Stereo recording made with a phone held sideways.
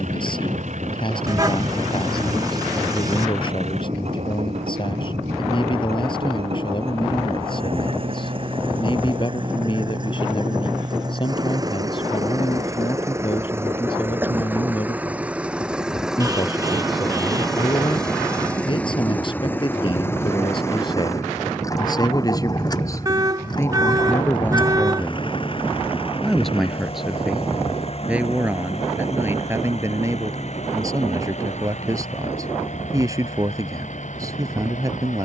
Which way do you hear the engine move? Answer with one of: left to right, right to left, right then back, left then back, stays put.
right to left.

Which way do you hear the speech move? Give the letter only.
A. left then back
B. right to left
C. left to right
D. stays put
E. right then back
C.